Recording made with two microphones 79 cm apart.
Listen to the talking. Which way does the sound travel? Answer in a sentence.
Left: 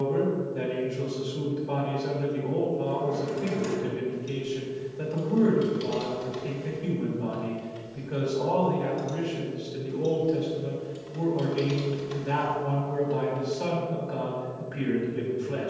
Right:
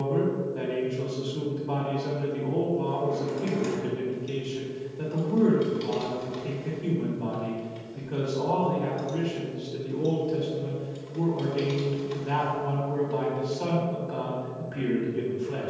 In this clip you hear the talking stay put.